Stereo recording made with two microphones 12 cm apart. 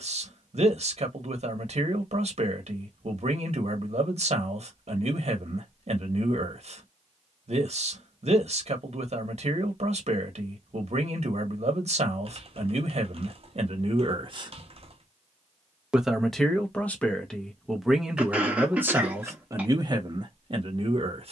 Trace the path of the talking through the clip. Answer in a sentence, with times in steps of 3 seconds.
In this clip you hear the talking on the right from 0 s, in the centre from 15 s and on the right from 18 s.